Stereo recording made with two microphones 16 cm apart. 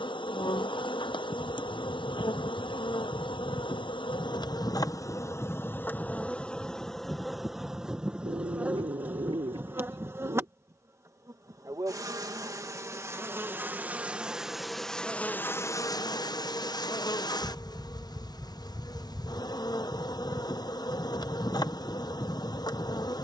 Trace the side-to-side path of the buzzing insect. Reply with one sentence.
You can hear the buzzing insect go right and come back.